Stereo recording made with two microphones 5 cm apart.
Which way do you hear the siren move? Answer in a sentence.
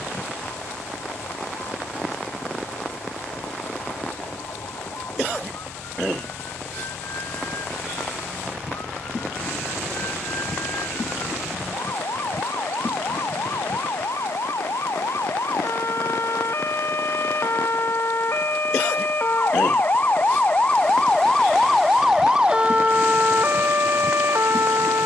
You can hear the siren move from left to right.